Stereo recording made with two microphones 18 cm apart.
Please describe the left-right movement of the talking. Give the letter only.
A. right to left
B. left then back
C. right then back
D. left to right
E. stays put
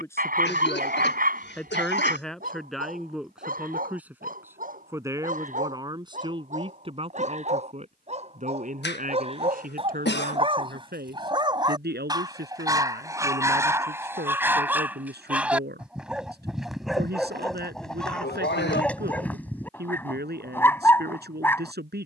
D.